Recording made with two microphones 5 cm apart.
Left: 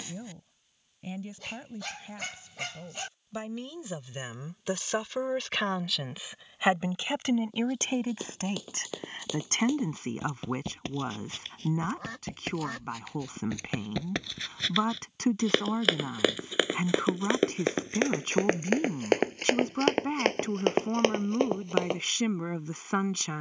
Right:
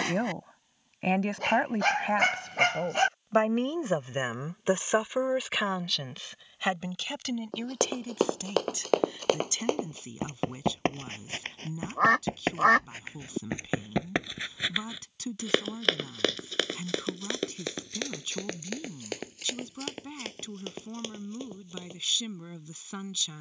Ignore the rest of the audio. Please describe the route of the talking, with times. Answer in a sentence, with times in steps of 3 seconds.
You can hear the talking on the right from 0 s and on the left from 6 s.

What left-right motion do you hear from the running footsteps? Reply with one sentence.
In this clip you hear the running footsteps travel towards the left.